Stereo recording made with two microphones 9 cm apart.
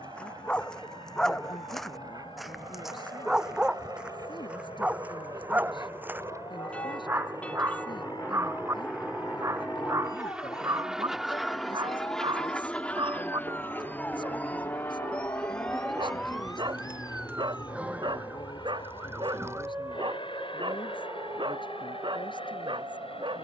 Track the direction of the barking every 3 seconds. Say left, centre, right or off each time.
centre, centre, right, right, right, right, right, right.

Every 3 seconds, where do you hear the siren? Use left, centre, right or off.
left, left, left, left, left, centre, right, right.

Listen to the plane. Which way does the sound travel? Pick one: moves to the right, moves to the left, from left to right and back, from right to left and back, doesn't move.
moves to the left.